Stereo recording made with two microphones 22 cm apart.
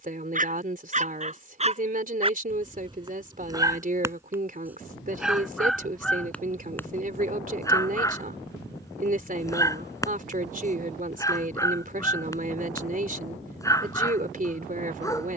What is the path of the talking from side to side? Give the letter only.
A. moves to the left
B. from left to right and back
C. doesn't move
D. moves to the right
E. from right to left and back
C.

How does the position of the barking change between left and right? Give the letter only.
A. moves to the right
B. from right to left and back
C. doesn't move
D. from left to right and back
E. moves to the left
E.